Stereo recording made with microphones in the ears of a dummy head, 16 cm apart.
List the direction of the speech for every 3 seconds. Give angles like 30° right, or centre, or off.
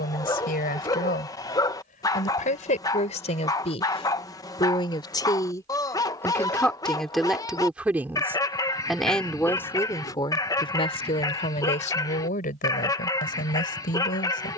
50° left, 30° left, centre, 30° left, 50° left.